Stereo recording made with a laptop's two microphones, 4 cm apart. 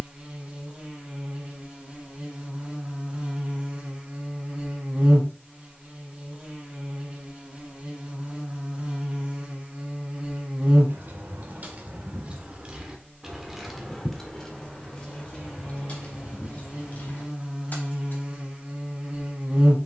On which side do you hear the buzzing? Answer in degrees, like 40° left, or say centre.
30° right.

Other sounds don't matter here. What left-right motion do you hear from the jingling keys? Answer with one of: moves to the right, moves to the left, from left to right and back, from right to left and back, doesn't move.
moves to the left.